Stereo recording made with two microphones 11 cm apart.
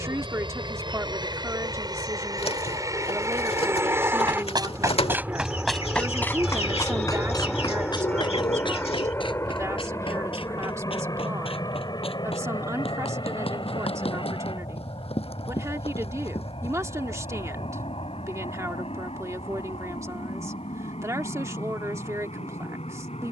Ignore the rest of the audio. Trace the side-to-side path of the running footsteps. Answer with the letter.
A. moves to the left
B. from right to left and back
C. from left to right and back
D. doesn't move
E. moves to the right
A.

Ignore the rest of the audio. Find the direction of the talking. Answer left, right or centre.
right.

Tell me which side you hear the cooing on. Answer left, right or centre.
left.